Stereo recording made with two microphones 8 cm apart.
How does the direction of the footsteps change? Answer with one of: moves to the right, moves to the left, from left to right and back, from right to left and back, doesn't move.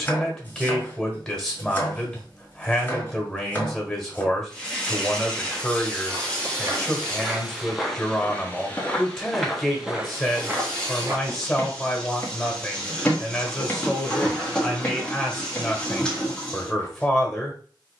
from right to left and back.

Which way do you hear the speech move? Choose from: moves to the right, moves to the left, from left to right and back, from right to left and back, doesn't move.
doesn't move.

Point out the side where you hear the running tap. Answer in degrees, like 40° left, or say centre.
10° left.